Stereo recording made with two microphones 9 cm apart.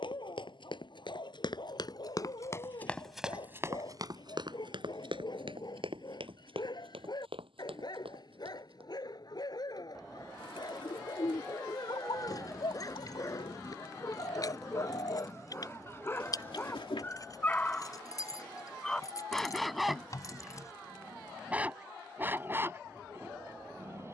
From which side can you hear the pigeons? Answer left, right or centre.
left.